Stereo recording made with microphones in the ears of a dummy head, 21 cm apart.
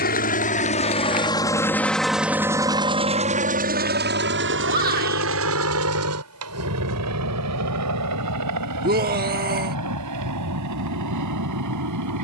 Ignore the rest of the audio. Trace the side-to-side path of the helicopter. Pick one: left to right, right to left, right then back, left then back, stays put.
left to right.